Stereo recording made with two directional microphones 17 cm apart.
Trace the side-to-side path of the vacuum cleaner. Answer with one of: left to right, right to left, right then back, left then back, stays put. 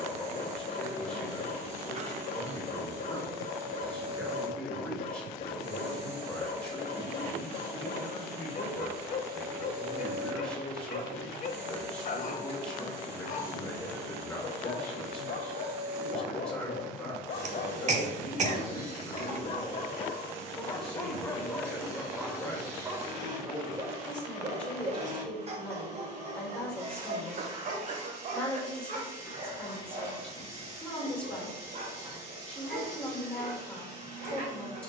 stays put.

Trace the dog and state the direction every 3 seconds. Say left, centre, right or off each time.
left, left, left, left, left, left, left, centre, right, right, right, right.